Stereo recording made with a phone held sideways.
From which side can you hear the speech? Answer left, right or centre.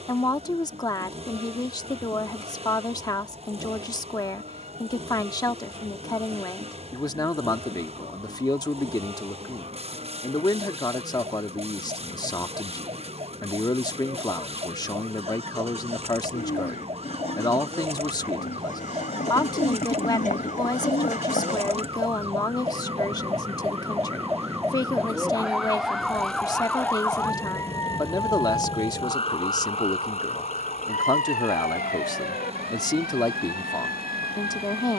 left.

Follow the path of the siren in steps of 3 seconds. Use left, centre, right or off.
right, right, right, right, right, right, right, right, centre, left, left, left.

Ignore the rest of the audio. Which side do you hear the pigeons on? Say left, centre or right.
left.